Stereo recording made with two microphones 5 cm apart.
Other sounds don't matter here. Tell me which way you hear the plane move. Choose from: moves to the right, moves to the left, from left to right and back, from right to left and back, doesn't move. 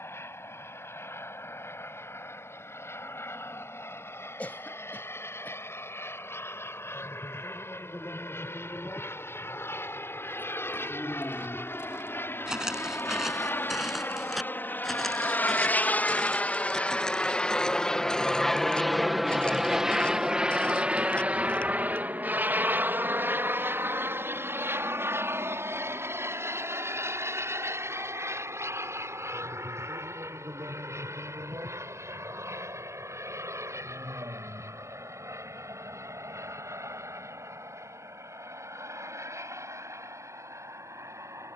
moves to the right.